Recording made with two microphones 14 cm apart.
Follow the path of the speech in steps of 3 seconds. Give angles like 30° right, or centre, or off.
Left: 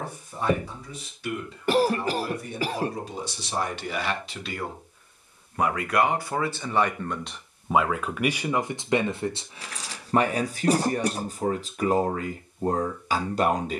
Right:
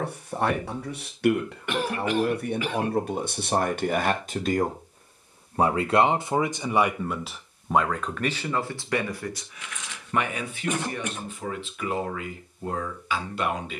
60° right, 40° right, centre, 30° left, 40° left.